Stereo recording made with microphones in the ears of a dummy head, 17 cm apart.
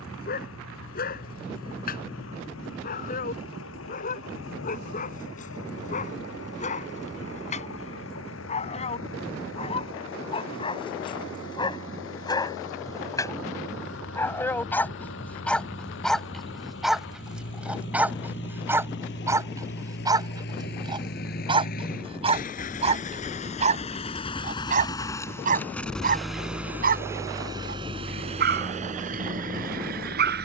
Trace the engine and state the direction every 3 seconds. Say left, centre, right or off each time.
left, left, left, left, left, left, left, left, centre, right.